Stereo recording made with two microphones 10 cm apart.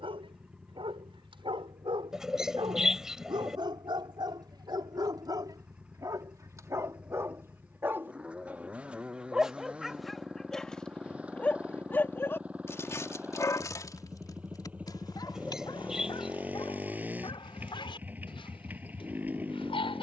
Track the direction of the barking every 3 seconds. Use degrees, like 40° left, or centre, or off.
60° right, 50° right, 30° right, centre, 30° left, 50° left, 60° left.